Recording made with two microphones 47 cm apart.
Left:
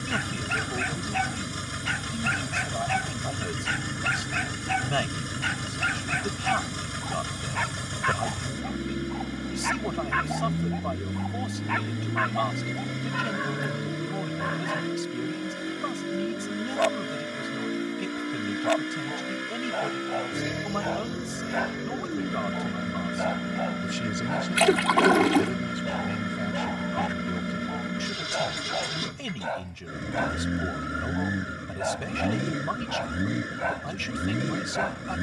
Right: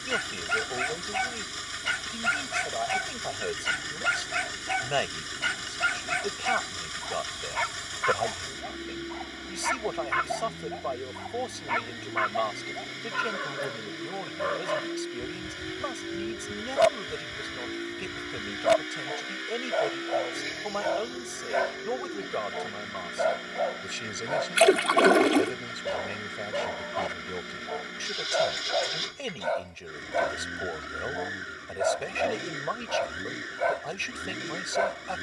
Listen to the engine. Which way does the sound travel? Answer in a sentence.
You can hear the engine stay put.